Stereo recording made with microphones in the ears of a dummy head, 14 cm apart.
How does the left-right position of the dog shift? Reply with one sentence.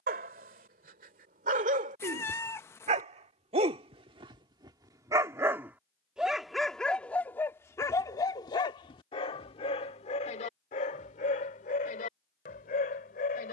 In this clip you hear the dog travel towards the left.